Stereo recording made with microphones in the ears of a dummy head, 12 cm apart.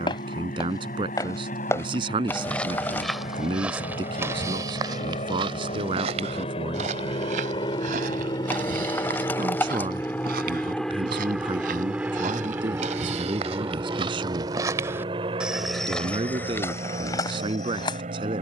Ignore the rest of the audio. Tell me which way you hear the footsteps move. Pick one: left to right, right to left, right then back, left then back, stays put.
right then back.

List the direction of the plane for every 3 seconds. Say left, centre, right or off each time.
left, left, left, centre, right, right.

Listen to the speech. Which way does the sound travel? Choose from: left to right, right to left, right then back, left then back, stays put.
stays put.